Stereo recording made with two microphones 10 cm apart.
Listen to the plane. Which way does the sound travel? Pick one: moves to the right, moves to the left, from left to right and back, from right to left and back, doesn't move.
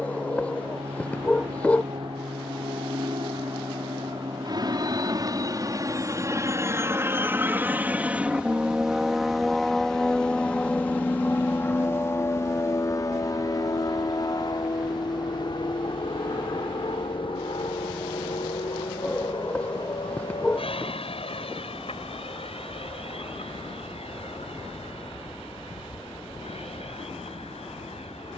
moves to the left.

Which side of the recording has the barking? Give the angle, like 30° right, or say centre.
10° left.